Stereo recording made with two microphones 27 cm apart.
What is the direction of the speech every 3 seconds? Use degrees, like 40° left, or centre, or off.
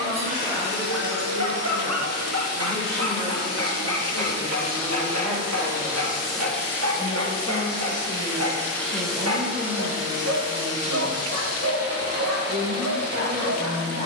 20° left, 10° left, 10° right, 40° right, 50° right.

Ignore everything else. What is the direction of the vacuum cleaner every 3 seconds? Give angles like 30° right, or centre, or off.
50° right, 30° right, 10° left, 20° right, 40° right.